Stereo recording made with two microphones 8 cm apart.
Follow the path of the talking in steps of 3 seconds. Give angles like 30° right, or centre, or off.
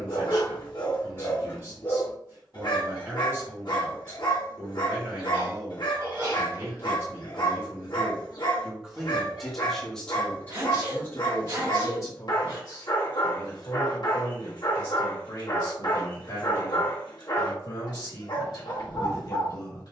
30° right, 30° right, 30° right, 20° left, 50° left, 60° left, 60° left.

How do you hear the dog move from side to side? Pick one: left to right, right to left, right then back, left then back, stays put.
stays put.